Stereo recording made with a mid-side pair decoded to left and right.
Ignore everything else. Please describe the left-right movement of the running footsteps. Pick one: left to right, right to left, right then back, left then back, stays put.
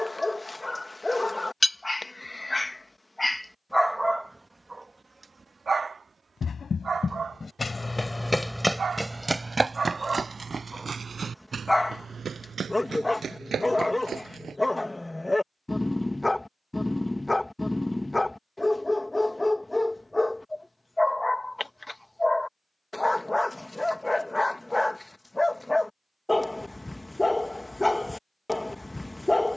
left to right.